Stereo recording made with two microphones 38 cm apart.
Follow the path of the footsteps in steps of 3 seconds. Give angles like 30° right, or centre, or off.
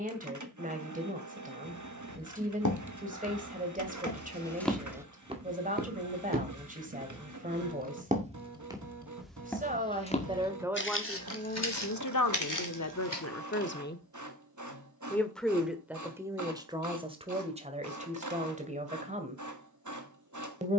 60° left, 10° left, 20° right, 20° left, 60° left, off, off.